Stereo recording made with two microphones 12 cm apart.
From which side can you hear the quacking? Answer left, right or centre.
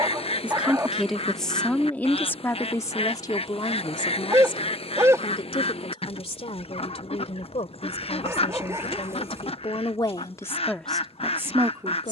left.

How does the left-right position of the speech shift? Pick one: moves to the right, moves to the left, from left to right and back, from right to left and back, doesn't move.
from right to left and back.